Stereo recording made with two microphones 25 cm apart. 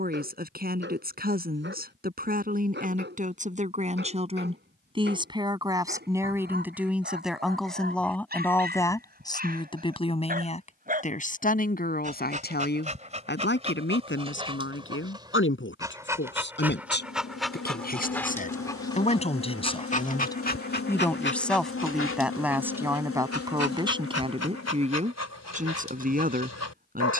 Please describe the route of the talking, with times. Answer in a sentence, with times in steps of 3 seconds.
In this clip you hear the talking on the right from 0 s, in the centre from 6 s, on the left from 9 s, in the centre from 21 s and on the right from 24 s.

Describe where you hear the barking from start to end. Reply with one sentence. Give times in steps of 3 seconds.
In this clip you hear the barking on the right from 0 s, in the centre from 15 s and on the left from 18 s.